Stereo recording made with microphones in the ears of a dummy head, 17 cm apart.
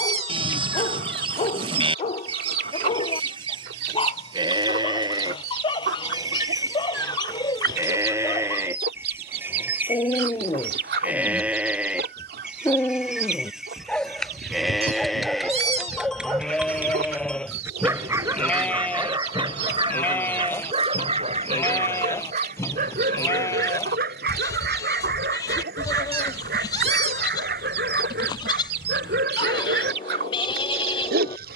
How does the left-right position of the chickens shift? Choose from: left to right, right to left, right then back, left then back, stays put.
stays put.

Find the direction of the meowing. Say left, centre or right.
right.